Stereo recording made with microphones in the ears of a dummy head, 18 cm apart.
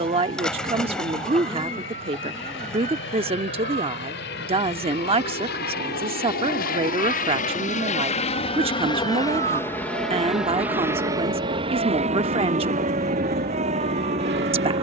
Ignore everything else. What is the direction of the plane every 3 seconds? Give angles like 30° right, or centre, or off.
70° left, 60° left, 40° left, centre, 50° right.